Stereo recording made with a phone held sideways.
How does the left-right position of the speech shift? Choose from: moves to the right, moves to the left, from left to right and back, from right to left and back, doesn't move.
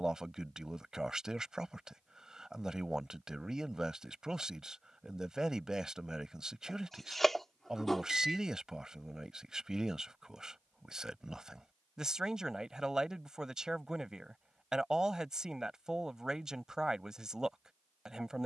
doesn't move.